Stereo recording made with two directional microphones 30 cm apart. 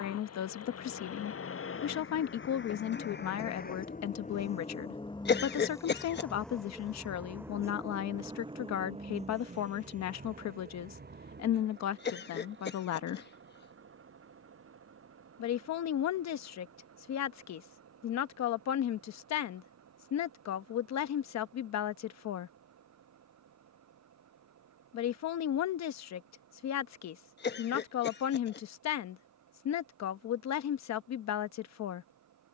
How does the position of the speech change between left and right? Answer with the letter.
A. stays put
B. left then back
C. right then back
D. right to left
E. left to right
A.